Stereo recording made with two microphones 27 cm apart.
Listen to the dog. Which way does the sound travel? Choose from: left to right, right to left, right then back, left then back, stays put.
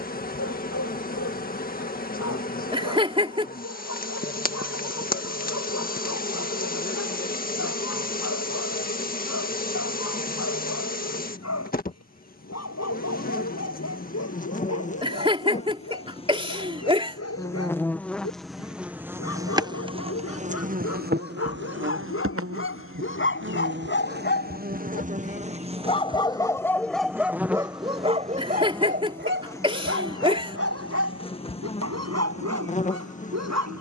left to right.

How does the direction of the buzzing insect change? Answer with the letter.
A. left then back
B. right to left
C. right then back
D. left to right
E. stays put
C.